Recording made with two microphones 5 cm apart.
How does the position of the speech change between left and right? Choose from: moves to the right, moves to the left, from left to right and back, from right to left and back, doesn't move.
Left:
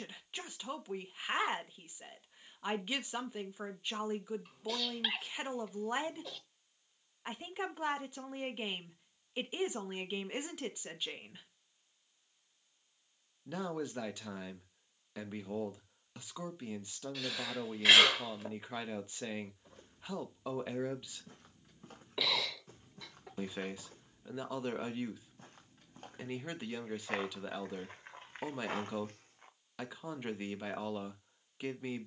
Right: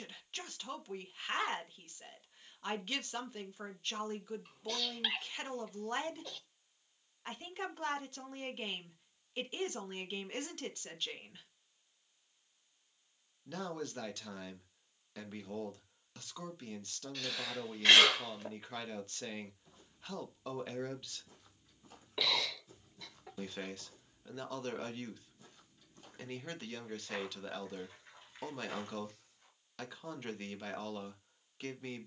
doesn't move.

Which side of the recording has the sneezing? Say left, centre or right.
centre.